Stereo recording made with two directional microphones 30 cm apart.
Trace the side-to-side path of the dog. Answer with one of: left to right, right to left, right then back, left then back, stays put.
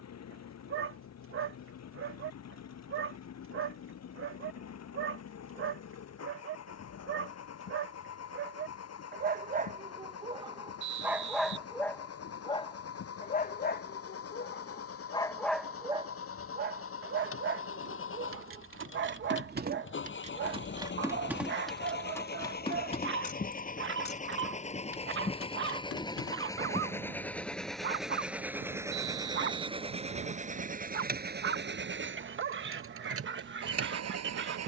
left then back.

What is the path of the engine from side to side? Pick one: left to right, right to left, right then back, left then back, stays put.
left to right.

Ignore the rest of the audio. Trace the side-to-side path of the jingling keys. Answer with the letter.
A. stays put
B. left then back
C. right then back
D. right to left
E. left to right
D.